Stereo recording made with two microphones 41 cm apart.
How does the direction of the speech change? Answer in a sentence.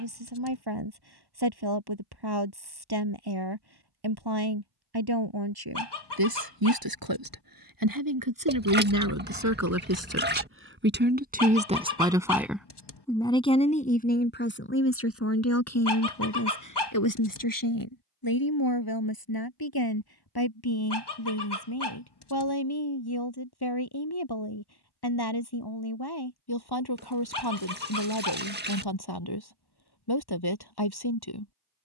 In this clip you hear the speech move to the left.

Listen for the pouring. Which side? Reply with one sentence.
In this clip you hear the pouring on the right.